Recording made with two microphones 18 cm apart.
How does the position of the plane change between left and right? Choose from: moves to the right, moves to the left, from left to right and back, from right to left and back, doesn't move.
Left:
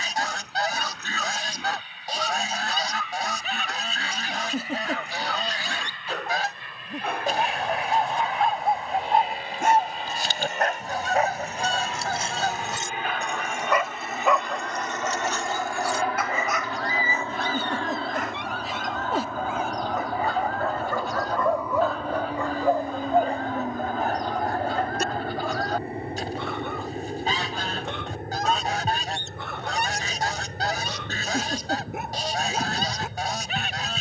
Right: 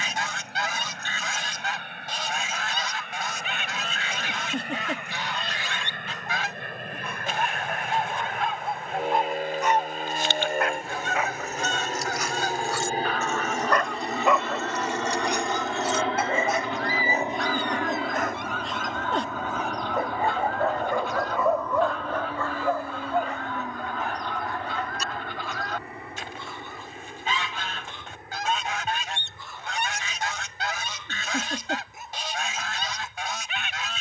moves to the left.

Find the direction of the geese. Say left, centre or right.
left.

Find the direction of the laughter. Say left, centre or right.
centre.